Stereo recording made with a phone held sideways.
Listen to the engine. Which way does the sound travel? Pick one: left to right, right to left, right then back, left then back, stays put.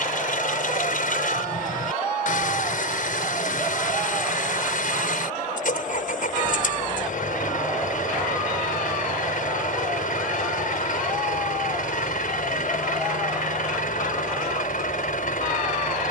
stays put.